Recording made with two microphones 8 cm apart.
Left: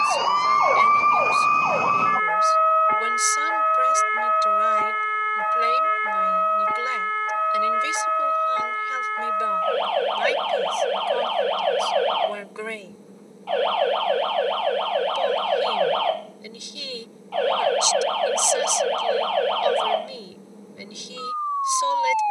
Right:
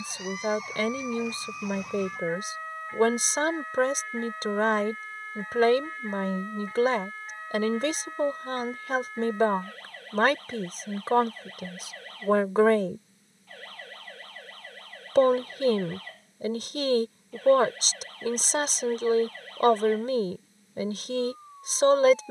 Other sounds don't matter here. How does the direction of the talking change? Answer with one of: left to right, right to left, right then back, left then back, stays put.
stays put.